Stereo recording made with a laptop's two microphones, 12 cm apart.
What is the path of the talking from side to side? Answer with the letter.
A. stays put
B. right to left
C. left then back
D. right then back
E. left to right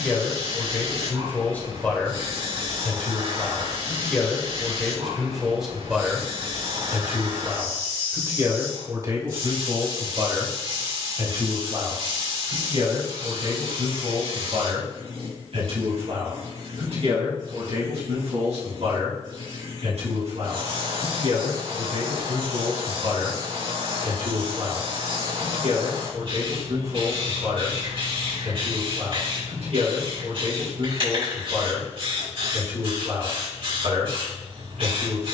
E.